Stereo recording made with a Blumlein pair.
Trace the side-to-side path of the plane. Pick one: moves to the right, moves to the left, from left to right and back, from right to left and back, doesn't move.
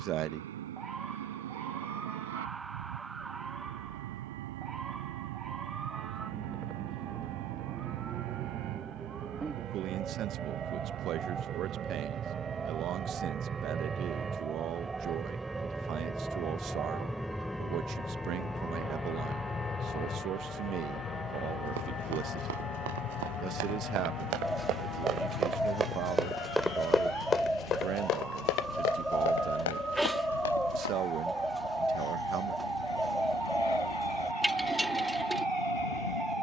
moves to the left.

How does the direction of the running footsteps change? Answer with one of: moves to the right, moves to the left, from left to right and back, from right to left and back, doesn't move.
moves to the left.